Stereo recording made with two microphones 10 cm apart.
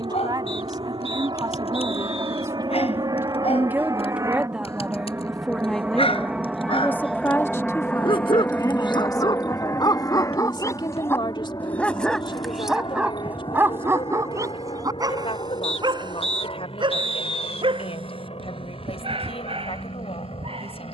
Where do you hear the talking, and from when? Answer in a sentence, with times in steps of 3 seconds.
You can hear the talking on the right from 0 s, in the centre from 3 s and on the left from 6 s.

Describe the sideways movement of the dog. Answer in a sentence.
You can hear the dog move from left to right.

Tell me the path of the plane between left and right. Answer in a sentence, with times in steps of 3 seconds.
You can hear the plane on the right from 0 s, in the centre from 6 s and on the left from 9 s.